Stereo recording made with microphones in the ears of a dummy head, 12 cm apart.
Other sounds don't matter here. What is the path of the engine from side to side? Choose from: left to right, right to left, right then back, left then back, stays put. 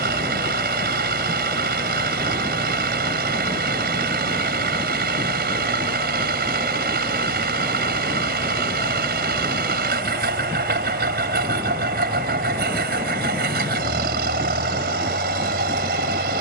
stays put.